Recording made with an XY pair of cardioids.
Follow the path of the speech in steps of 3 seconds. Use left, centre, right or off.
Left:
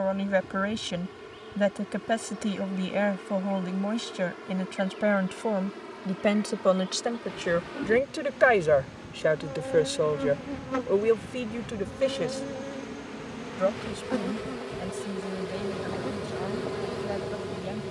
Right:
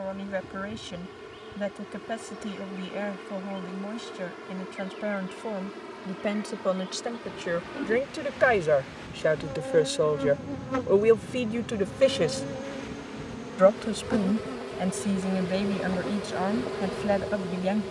left, left, left, centre, right, right.